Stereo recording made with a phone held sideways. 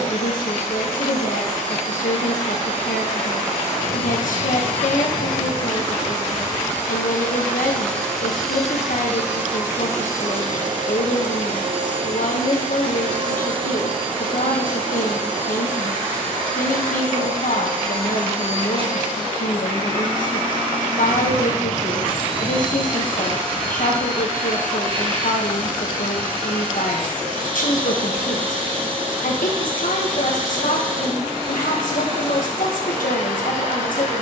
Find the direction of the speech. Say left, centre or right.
left.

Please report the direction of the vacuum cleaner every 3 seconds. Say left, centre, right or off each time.
left, left, centre, right, right, right, right, right, right, right, right, right.